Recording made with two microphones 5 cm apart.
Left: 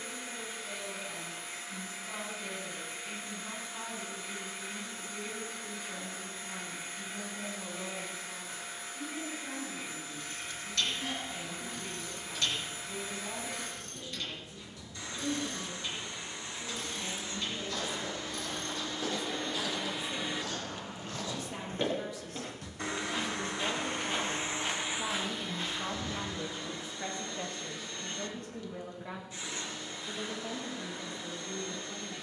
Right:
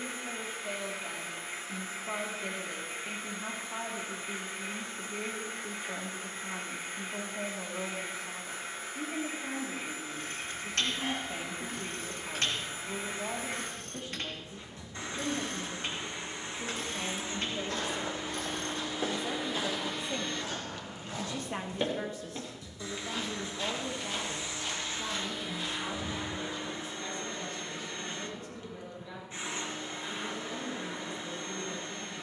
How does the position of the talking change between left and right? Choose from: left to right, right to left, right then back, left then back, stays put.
right to left.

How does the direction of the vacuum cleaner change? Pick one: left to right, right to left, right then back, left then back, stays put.
left then back.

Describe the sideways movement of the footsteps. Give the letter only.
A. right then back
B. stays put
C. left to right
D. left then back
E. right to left
E.